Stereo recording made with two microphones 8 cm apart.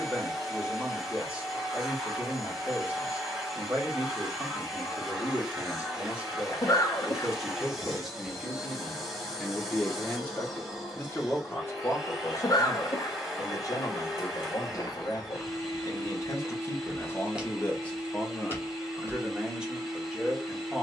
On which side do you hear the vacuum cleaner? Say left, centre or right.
centre.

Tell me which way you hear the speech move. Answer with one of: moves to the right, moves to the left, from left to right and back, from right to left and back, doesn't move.
from right to left and back.